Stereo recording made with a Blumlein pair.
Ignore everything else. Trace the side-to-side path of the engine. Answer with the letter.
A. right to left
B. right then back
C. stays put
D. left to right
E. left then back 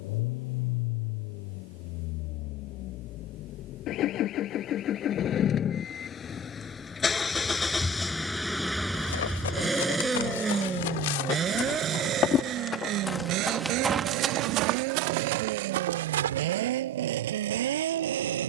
D.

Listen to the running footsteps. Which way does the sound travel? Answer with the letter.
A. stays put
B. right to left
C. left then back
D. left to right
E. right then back
D.